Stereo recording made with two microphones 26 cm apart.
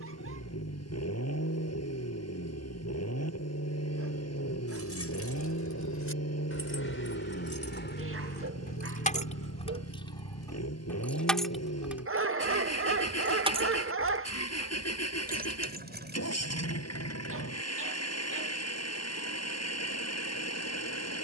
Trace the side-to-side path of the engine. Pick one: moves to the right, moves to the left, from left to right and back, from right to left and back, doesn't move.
doesn't move.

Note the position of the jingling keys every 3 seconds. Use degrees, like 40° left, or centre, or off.
off, 60° left, 40° left, 10° left, 20° right, 40° right, off.